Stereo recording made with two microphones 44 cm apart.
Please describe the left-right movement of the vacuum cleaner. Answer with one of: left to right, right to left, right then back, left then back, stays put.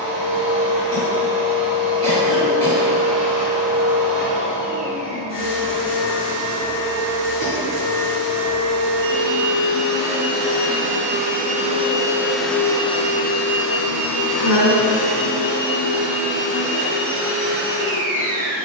right to left.